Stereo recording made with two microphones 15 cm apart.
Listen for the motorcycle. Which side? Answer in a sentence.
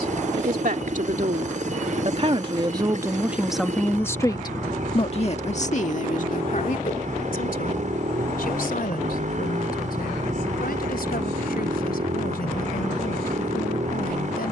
In this clip you hear the motorcycle on the right.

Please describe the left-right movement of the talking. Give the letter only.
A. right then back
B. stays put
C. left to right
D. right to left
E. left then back
D.